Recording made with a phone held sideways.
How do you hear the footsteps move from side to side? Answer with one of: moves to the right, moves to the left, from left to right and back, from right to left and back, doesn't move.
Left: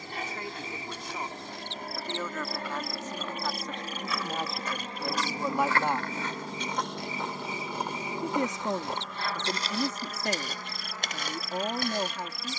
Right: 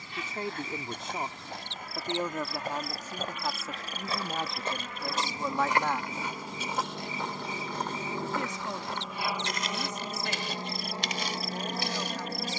moves to the left.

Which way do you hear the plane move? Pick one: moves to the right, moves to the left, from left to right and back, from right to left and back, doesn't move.
moves to the right.